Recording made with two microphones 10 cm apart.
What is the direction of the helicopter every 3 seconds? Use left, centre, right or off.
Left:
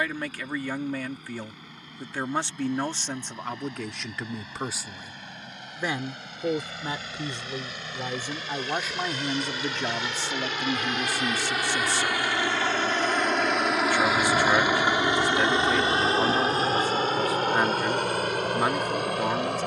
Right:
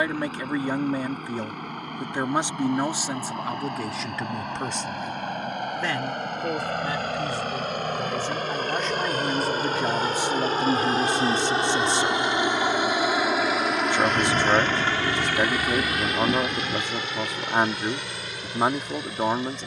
right, right, right, right, centre, left, left.